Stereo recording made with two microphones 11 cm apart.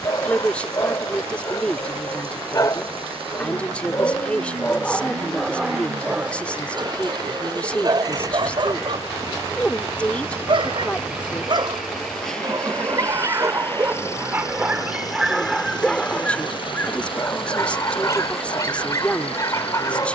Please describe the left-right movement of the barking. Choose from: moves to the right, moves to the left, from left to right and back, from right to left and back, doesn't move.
from left to right and back.